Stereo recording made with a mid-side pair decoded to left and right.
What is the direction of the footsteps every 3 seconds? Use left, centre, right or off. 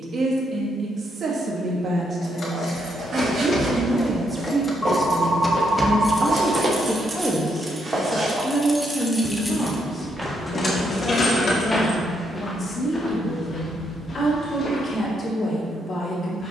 right, right, right, centre, left, off.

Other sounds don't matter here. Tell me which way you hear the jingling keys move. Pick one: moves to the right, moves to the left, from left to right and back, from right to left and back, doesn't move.
from left to right and back.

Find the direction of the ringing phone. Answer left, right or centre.
centre.